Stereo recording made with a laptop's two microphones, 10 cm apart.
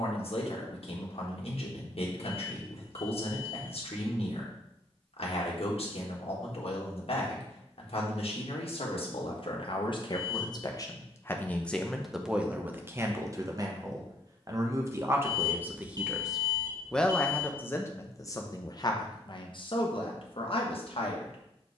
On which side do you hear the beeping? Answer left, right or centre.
right.